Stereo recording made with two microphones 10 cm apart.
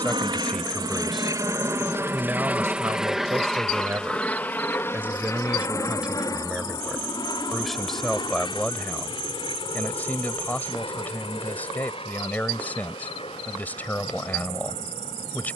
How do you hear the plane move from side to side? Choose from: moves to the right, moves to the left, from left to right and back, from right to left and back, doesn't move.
moves to the left.